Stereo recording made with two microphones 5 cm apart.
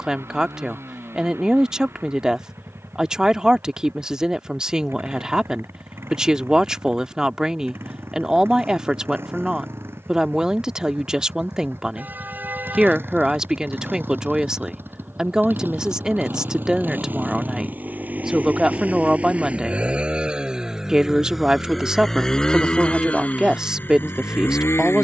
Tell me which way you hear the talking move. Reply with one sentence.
You can hear the talking stay put.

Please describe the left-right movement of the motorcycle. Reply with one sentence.
In this clip you hear the motorcycle go from the right side to the left.